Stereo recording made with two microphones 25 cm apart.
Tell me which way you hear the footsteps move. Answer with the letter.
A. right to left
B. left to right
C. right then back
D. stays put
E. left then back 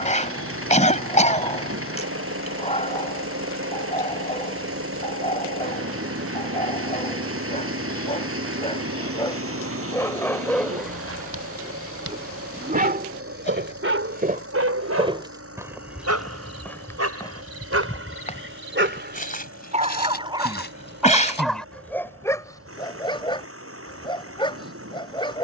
A.